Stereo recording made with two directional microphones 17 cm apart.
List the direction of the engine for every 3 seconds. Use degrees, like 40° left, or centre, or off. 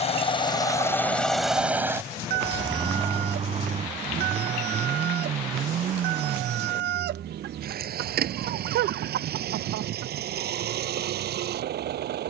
centre, 40° right, 60° right, 60° right.